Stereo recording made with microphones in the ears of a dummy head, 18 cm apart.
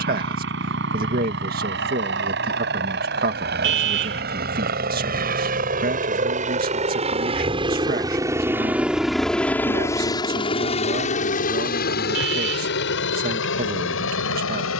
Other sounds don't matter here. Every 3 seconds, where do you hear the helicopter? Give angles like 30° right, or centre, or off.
60° right, 50° right, 30° right, 20° left, 60° left.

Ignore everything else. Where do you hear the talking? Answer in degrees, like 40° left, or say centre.
50° right.